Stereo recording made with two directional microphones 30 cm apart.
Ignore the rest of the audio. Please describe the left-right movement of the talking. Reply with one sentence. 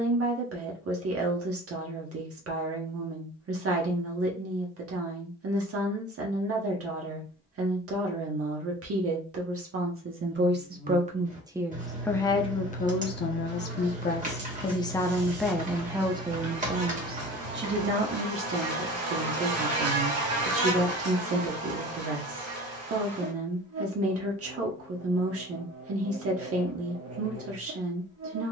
In this clip you hear the talking go left and come back.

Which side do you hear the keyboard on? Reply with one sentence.
You can hear the keyboard on the right.